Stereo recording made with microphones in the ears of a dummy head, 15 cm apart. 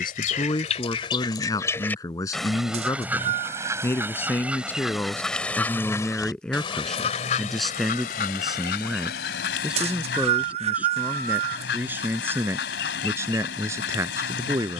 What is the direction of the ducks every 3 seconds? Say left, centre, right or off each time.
left, centre, left, left, left.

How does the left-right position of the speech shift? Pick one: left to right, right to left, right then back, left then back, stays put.
left to right.